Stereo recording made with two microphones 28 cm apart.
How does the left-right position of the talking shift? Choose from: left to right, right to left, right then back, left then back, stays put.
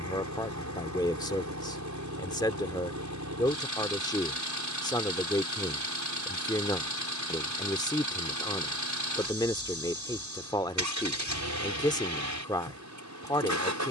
stays put.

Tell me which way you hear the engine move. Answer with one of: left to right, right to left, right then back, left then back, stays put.
stays put.